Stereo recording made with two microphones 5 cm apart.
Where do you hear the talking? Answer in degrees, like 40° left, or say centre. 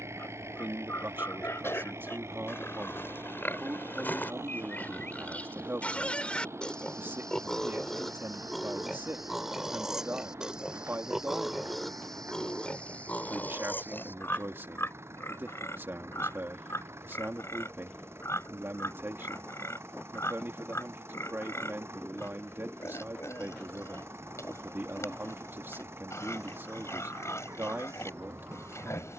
40° right.